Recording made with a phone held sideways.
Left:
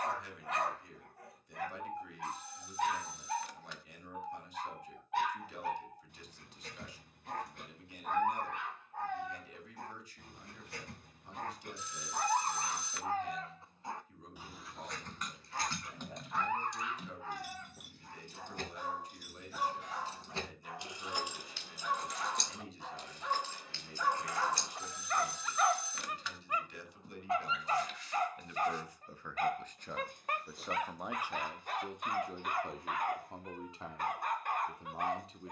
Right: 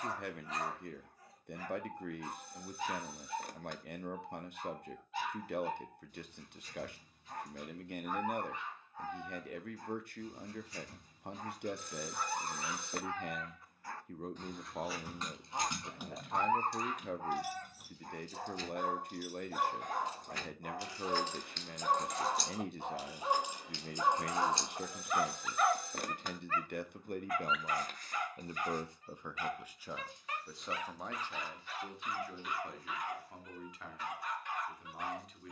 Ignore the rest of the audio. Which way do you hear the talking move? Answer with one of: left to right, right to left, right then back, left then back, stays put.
right to left.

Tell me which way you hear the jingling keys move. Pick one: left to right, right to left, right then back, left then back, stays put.
left then back.